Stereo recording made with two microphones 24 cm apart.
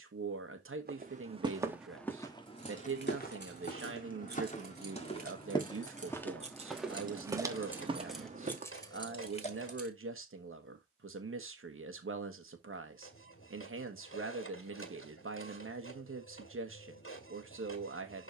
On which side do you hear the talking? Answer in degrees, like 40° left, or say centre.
60° right.